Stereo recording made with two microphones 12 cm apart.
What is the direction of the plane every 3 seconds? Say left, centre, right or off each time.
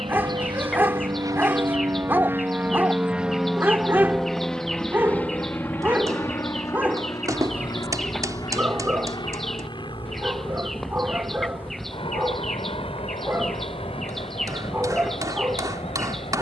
right, centre, left, left, left, left.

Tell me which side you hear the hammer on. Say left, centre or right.
right.